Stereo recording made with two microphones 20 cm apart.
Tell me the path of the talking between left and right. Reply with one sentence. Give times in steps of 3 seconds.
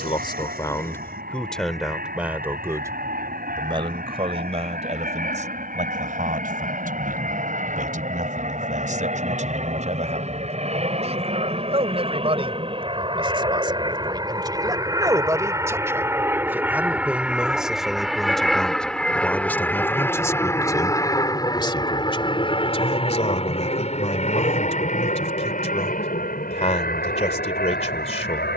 You can hear the talking in the centre from 0 s, on the right from 3 s, in the centre from 15 s and on the left from 21 s.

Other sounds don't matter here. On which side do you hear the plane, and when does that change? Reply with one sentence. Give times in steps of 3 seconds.
In this clip you hear the plane on the right from 0 s, in the centre from 15 s and on the left from 21 s.